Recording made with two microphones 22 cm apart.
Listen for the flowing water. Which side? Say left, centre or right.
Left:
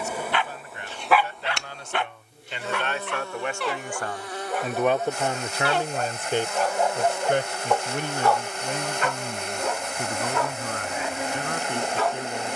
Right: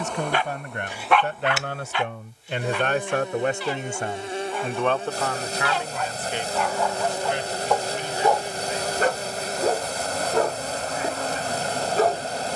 right.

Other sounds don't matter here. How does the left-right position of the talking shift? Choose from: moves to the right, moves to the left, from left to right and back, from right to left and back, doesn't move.
moves to the left.